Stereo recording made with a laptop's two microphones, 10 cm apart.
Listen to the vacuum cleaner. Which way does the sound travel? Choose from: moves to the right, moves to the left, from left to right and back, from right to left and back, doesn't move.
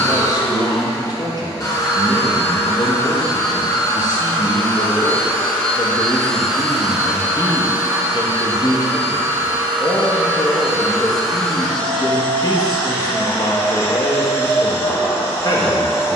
from left to right and back.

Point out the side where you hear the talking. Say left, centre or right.
left.